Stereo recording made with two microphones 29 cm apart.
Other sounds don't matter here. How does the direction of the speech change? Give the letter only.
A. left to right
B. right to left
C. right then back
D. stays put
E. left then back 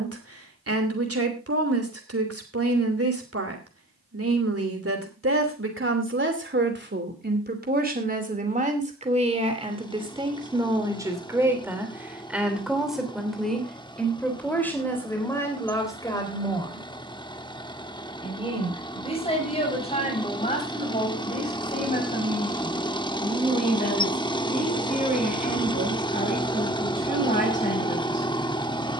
B.